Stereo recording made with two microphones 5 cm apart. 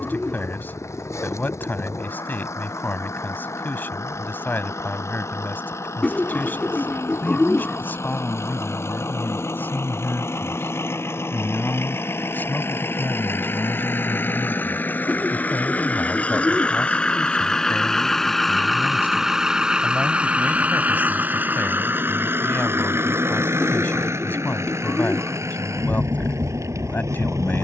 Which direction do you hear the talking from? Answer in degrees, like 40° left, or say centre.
40° left.